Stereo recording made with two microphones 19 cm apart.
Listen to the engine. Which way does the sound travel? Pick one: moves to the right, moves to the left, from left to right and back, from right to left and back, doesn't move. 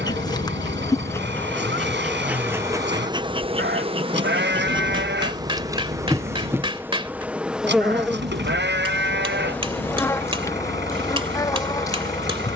doesn't move.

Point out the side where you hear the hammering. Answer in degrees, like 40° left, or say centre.
30° right.